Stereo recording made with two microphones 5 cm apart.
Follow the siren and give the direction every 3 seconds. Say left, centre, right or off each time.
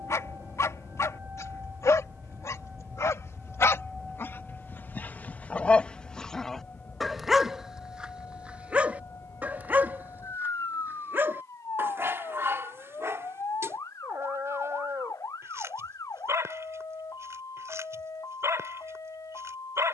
right, centre, left, left, left, left, left.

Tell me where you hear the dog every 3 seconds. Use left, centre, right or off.
left, left, centre, right, right, right, right.